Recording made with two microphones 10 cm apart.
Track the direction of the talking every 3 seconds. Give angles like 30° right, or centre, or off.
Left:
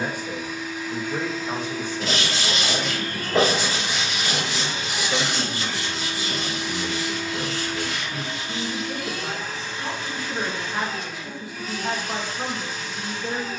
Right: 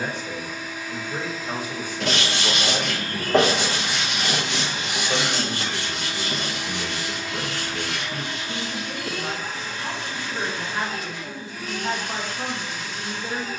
10° right, 60° right, 30° right, 10° left, 10° left.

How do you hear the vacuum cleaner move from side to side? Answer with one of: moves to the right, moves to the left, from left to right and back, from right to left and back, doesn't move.
doesn't move.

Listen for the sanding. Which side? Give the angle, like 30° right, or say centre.
80° right.